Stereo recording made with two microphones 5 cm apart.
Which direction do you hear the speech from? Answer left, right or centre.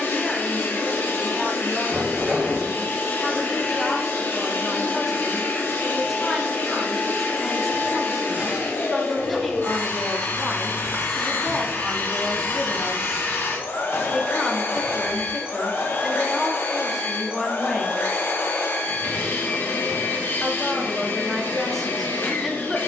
centre.